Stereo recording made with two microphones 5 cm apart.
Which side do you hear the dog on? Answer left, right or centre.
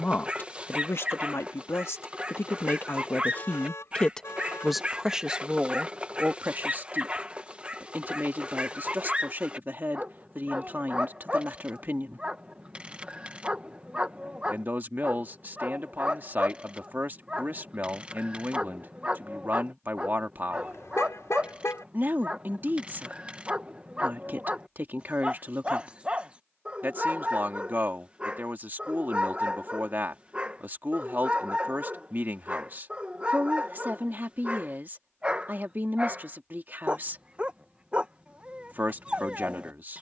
right.